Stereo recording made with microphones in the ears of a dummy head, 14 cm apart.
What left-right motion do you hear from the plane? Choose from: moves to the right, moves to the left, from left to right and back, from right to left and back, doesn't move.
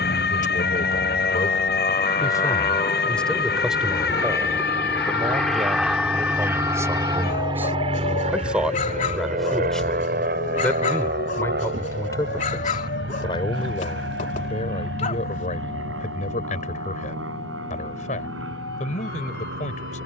moves to the right.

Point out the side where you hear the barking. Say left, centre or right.
left.